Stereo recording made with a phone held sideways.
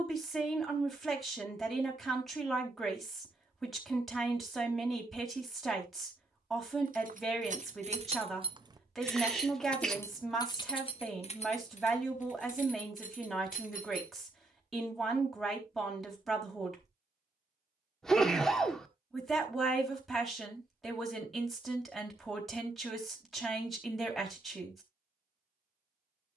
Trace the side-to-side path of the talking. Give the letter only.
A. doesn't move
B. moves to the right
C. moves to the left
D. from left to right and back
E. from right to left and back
A.